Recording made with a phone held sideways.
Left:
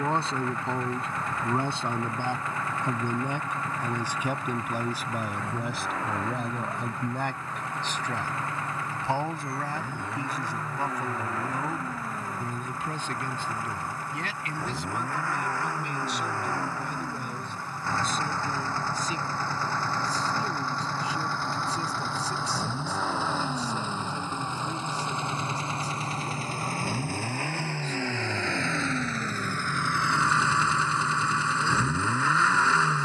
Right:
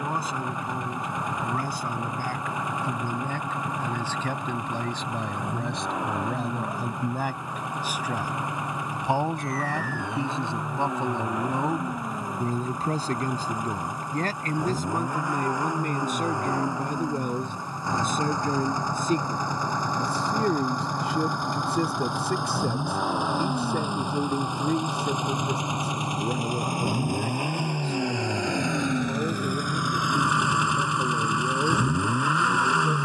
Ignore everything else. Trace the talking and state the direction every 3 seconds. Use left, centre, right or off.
left, centre, centre, right, right, right, right, right, right, right, right.